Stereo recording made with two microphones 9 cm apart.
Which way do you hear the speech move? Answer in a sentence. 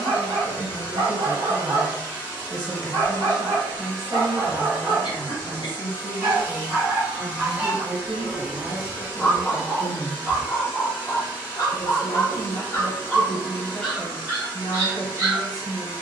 In this clip you hear the speech move from left to right and back again.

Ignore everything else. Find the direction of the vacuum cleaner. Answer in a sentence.
In this clip you hear the vacuum cleaner on the right.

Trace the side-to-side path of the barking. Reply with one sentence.
You can hear the barking go left and come back.